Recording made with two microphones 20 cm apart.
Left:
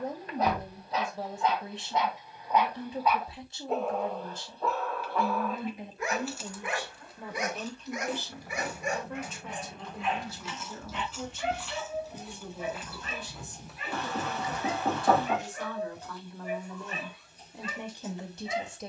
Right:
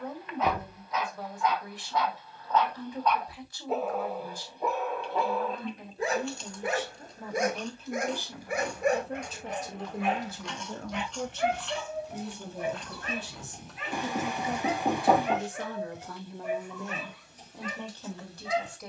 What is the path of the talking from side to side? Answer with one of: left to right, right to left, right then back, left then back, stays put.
right then back.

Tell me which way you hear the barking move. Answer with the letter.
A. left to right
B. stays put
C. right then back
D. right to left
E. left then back
A.